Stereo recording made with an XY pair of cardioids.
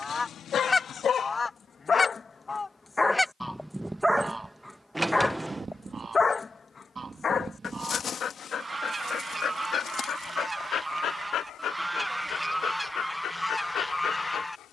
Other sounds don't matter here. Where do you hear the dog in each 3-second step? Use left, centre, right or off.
left, centre, left, left, left.